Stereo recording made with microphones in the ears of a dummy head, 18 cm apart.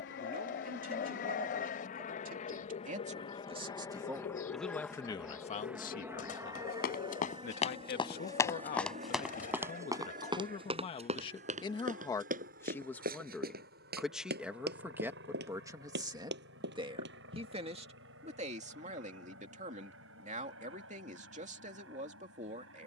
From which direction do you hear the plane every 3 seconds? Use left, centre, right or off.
left, centre, right, right, right, right, right, right.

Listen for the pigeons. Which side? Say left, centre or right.
left.